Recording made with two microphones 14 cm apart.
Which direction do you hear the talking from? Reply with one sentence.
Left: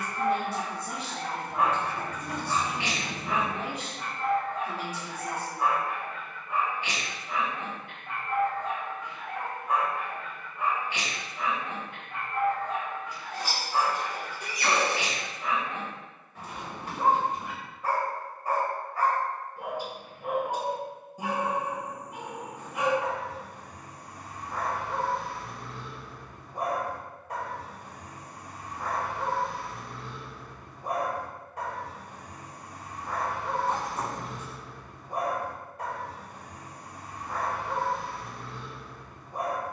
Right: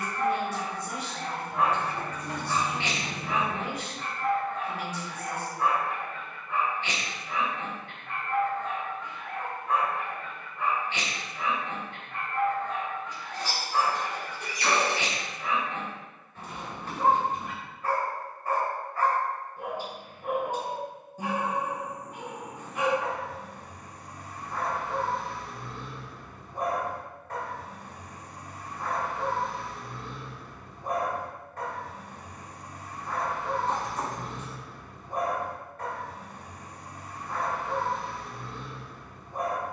You can hear the talking on the left.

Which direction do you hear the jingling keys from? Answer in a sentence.
In this clip you hear the jingling keys in the centre.